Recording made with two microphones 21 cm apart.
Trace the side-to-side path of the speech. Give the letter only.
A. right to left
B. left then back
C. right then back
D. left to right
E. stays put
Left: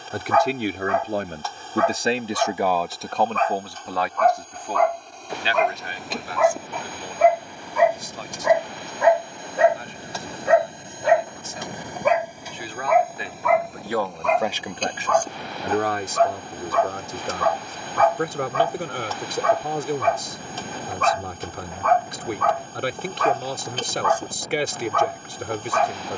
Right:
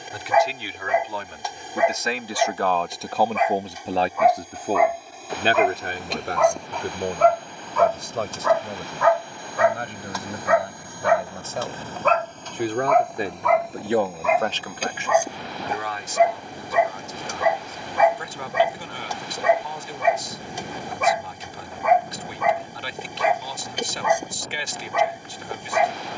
C.